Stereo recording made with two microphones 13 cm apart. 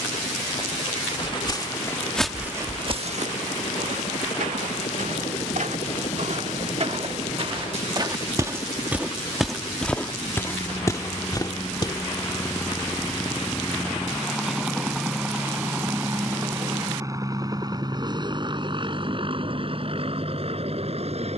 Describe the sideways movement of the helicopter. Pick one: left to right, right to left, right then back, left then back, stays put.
left to right.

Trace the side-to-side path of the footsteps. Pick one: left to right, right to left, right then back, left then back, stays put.
right then back.